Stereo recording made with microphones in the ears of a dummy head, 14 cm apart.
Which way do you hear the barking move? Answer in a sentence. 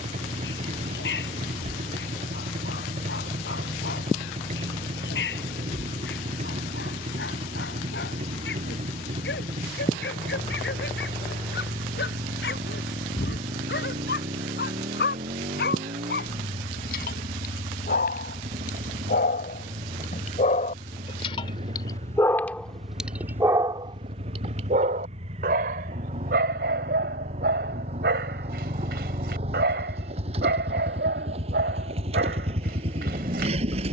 You can hear the barking go from the left side to the right.